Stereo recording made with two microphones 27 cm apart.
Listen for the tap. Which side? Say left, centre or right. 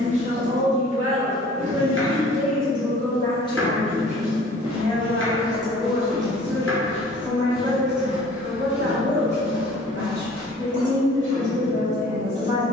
right.